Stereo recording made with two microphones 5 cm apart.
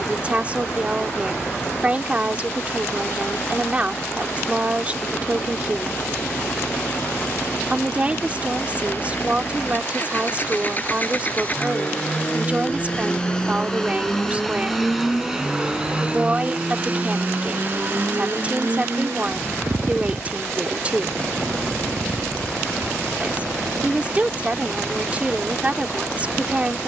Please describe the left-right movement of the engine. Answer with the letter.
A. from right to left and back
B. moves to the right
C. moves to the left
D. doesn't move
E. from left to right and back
B.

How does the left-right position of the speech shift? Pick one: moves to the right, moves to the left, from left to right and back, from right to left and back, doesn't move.
doesn't move.